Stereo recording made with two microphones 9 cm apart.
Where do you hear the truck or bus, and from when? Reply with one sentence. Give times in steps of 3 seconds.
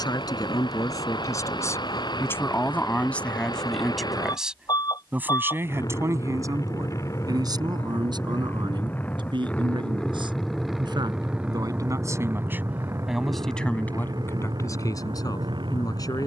You can hear the truck or bus on the left from 0 s, in the centre from 9 s and on the right from 12 s.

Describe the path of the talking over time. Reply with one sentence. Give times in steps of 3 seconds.
You can hear the talking on the left from 0 s, in the centre from 3 s, on the right from 6 s, in the centre from 12 s and on the left from 15 s.